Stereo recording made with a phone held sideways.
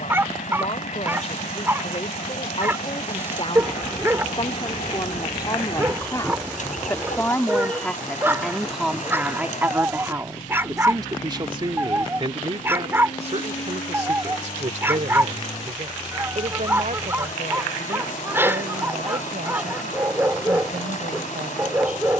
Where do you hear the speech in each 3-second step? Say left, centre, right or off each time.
left, left, centre, right, right, right, right, right.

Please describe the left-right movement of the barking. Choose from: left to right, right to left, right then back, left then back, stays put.
stays put.